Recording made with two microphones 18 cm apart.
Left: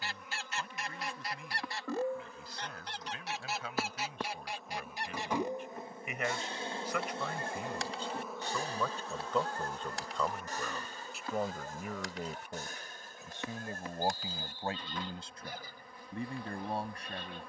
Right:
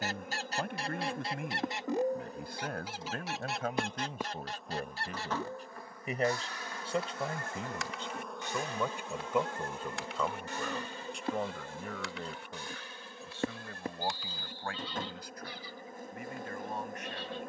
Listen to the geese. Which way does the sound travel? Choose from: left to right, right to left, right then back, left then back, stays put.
right to left.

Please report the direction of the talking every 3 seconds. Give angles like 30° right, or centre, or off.
60° right, 40° right, 20° right, centre, 20° left, 30° left.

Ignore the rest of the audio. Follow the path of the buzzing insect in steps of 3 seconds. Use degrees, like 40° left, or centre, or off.
40° right, centre, 10° left, 30° right, 50° right, 50° right.